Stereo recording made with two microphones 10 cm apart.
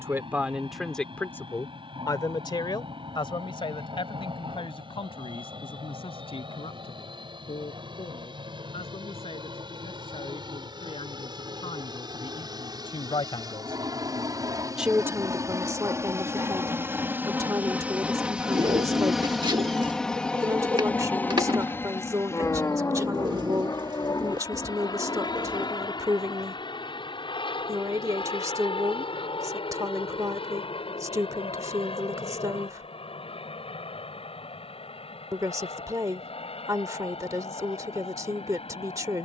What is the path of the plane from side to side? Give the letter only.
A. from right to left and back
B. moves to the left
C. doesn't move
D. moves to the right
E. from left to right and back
B.